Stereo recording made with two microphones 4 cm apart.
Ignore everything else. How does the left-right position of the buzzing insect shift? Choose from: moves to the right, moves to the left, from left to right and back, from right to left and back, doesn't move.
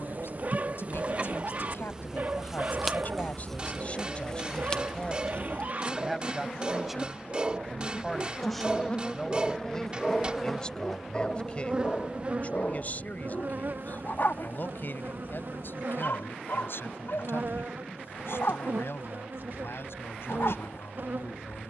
from right to left and back.